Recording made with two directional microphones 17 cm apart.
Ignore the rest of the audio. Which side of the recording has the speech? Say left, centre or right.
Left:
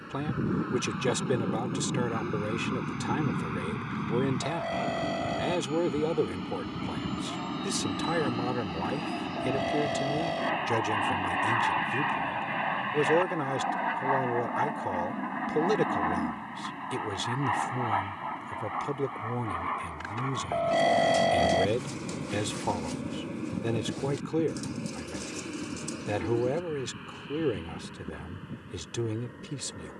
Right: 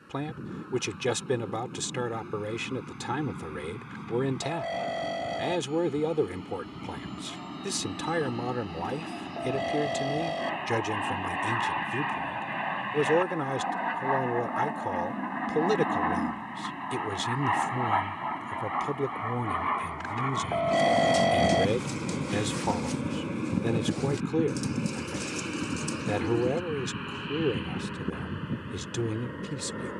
centre.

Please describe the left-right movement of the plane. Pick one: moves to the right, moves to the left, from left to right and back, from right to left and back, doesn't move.
moves to the right.